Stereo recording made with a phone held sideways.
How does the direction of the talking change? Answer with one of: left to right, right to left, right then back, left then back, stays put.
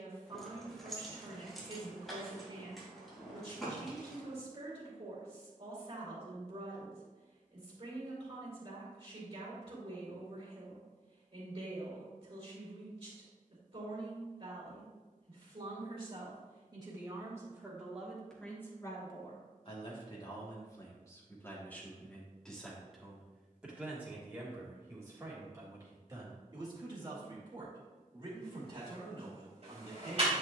left then back.